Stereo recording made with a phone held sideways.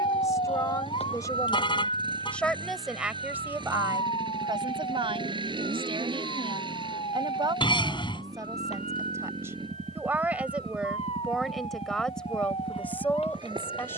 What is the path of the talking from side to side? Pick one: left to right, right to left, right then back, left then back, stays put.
right then back.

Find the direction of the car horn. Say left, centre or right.
left.